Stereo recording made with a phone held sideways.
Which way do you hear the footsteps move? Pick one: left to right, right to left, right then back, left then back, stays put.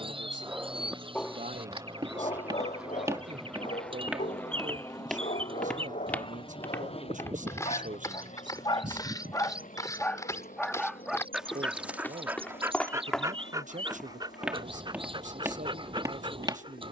left then back.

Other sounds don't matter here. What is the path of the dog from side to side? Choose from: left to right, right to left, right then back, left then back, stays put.
left then back.